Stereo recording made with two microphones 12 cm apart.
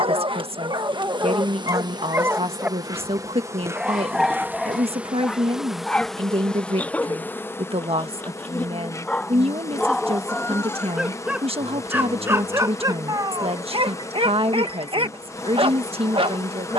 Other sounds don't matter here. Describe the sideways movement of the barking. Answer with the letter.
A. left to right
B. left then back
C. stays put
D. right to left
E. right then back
B.